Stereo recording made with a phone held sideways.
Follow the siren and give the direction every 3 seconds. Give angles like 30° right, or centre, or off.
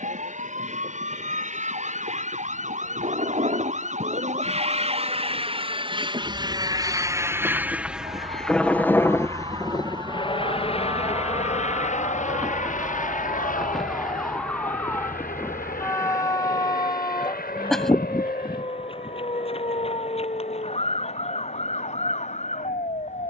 70° right, 60° right, 50° right, 30° right, centre, 20° left, 40° left, 50° left.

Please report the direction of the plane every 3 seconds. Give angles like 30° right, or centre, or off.
70° right, 50° right, 10° right, 40° left, 60° left, 70° left, 80° left, 80° left.